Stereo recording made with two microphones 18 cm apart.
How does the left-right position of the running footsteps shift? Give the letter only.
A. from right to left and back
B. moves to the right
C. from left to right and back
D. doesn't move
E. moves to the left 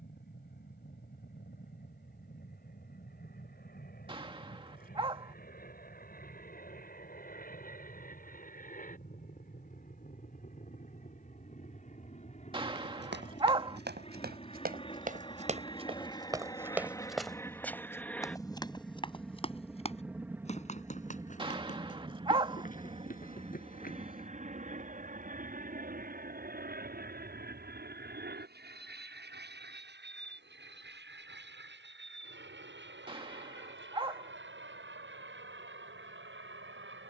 E.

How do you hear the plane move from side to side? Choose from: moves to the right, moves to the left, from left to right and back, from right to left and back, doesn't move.
moves to the right.